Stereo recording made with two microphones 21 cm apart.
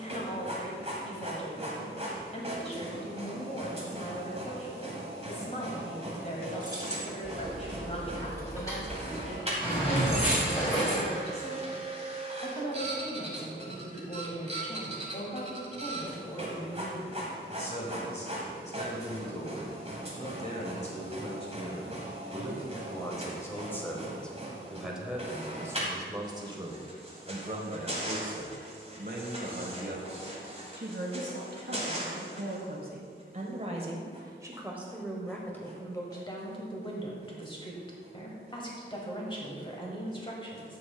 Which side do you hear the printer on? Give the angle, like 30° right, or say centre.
30° right.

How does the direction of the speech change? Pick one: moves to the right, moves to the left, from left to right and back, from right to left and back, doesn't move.
from left to right and back.